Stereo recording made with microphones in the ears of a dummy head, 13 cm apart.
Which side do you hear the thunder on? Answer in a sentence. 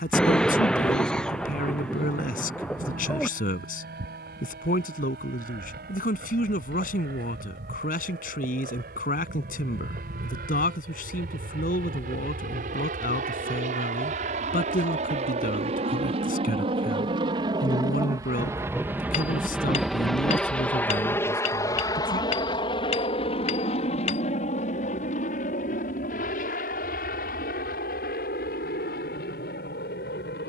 In this clip you hear the thunder in the centre.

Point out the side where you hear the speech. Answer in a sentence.
In this clip you hear the speech on the left.